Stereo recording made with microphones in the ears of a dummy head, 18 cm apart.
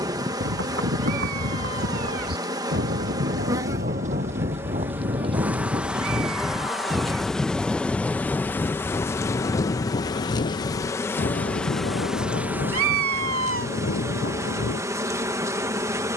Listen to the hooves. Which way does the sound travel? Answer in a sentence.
In this clip you hear the hooves move to the left.